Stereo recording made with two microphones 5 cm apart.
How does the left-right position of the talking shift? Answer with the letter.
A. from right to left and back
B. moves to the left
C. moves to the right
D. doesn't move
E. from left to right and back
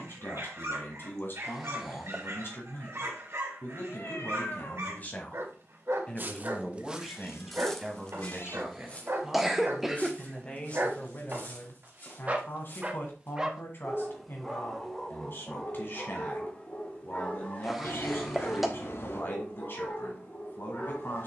E.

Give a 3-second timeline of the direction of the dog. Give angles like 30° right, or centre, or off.
70° right, 70° right, 70° right, 60° right, 10° right, 20° left, 40° left.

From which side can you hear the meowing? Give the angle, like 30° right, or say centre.
60° left.